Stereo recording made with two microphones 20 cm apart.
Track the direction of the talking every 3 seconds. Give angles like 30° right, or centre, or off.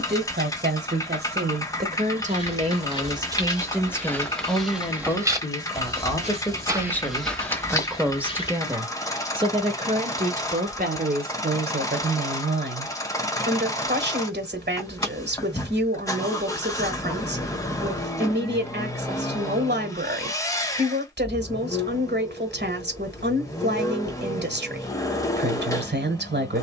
50° right, centre, centre, 40° right, 60° right, 60° right, 60° right, 60° right, 60° right.